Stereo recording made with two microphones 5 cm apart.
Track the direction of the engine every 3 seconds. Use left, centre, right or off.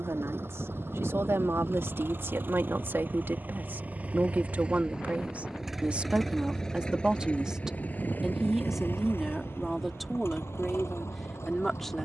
right, right, left, left.